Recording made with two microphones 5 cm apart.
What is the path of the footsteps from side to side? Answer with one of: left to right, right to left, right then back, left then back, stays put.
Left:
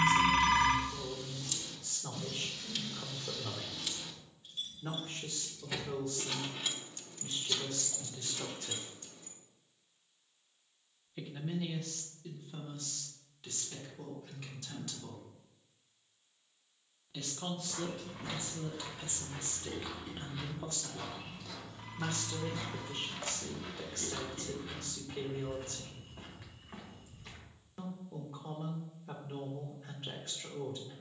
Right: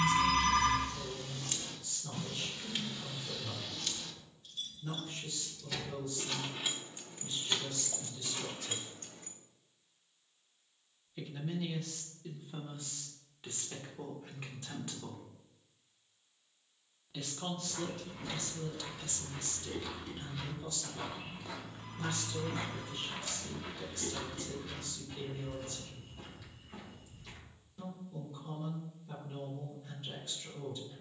right then back.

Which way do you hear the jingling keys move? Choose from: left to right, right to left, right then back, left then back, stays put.
left then back.